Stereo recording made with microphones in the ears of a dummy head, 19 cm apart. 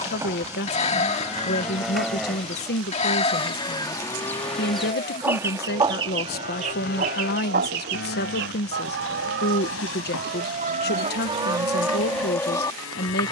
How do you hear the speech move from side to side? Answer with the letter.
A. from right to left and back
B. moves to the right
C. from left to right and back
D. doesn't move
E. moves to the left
D.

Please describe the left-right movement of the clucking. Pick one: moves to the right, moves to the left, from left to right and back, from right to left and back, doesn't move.
from left to right and back.